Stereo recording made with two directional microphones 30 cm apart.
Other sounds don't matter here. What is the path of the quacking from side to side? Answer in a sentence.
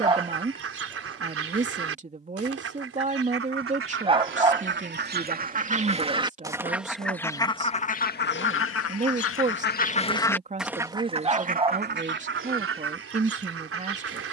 You can hear the quacking go left and come back.